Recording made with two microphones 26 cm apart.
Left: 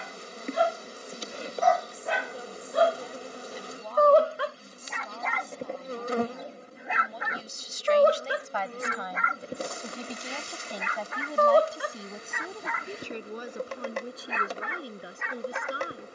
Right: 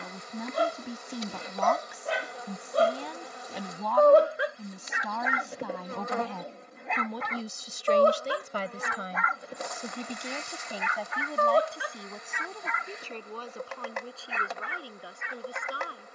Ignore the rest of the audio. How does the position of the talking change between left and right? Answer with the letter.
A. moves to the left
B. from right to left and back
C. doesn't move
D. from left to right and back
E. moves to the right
A.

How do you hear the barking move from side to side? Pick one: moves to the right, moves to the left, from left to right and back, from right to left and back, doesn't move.
moves to the left.